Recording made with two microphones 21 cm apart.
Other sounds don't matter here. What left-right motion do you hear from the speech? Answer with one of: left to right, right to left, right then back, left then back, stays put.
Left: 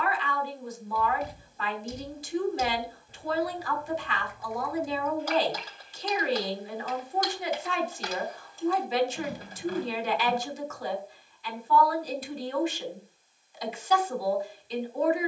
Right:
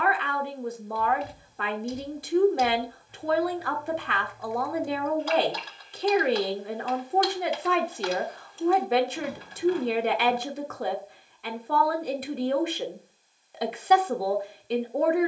stays put.